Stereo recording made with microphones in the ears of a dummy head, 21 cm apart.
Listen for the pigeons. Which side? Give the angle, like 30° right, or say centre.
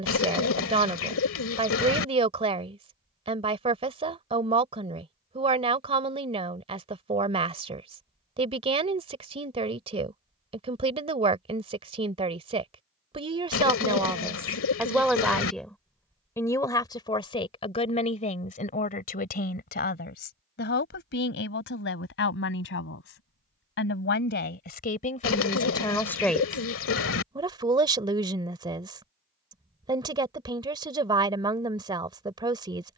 60° left.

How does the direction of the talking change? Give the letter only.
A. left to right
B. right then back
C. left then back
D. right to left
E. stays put
C.